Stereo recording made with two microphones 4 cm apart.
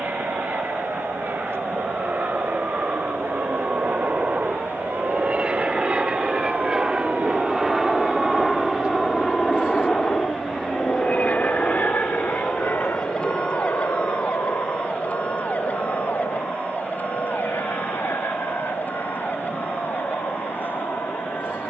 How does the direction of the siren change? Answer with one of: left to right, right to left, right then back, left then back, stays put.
right to left.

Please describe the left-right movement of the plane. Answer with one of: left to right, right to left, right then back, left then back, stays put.
right to left.